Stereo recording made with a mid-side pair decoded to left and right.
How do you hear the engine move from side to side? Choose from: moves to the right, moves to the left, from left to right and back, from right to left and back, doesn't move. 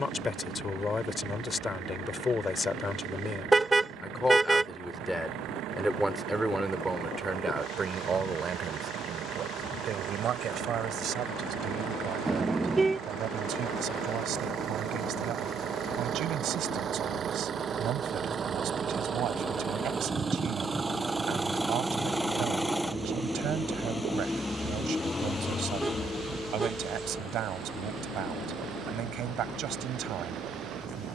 moves to the left.